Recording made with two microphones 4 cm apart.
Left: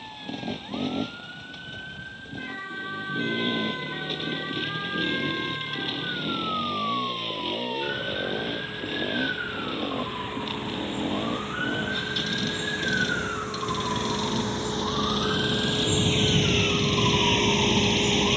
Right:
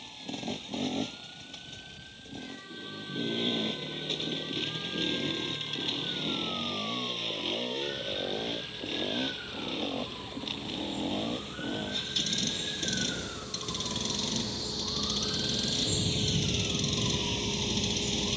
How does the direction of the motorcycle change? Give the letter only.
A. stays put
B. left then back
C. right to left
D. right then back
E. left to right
A.